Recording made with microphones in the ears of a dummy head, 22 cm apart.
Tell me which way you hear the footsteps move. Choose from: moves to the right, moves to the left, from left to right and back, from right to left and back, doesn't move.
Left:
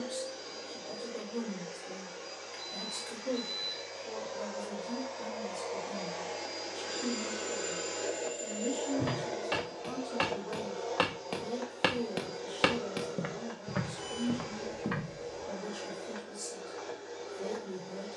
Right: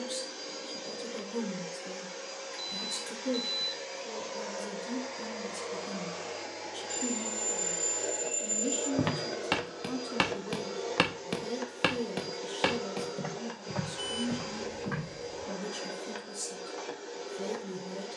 moves to the left.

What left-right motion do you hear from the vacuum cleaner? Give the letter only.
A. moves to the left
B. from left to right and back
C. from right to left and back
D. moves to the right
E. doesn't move
C.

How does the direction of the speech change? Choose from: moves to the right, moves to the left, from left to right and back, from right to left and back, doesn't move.
doesn't move.